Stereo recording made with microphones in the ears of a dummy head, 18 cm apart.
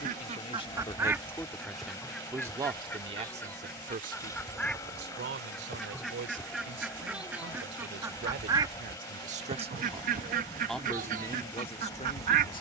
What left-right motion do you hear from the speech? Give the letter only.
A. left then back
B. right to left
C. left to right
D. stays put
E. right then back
E.